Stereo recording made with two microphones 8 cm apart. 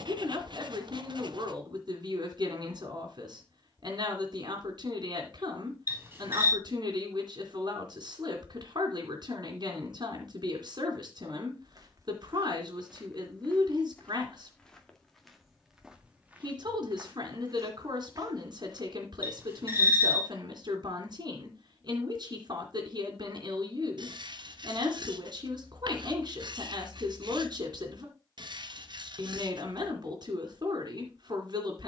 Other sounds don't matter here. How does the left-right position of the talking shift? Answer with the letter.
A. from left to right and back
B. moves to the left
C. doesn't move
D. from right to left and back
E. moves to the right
C.